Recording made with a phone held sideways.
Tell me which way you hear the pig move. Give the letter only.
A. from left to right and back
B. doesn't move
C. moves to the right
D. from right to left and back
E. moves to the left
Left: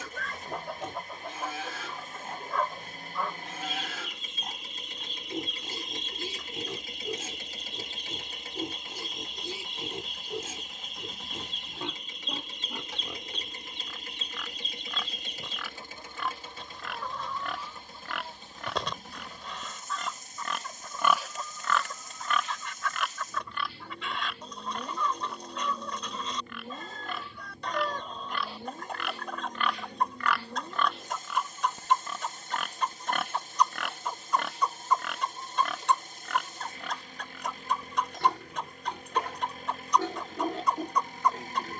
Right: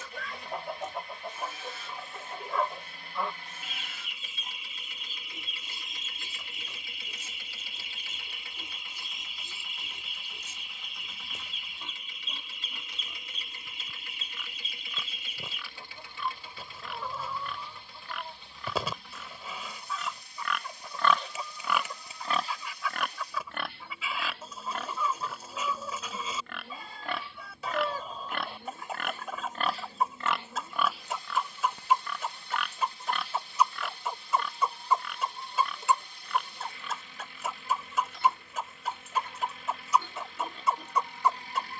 A.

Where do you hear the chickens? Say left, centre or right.
centre.